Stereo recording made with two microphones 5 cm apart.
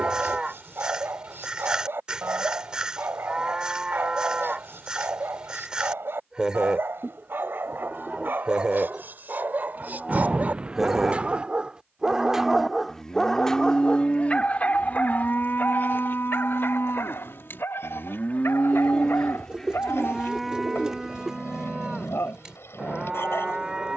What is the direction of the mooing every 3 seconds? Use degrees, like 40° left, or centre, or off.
20° right, 20° right, 20° right, 10° right, 20° left, 50° left, 20° left, 20° right.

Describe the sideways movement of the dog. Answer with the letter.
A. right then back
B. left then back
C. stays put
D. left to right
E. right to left
E.